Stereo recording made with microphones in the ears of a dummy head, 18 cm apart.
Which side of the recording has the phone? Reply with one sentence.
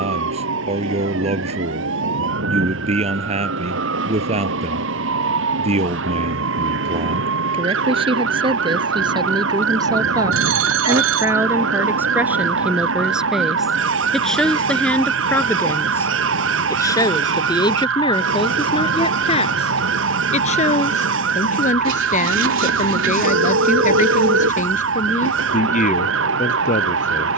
In this clip you hear the phone on the right.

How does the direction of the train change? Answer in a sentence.
You can hear the train stay put.